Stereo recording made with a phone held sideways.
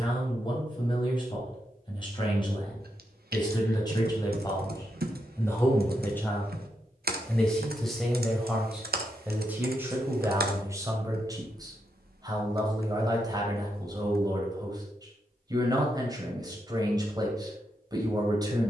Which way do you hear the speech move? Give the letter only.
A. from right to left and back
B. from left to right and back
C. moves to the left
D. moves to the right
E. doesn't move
D.